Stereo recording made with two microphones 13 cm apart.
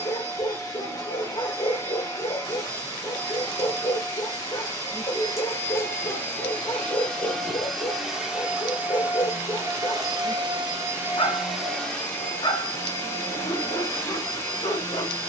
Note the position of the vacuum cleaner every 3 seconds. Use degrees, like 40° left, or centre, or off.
20° left, 20° left, centre, 20° right, 20° left.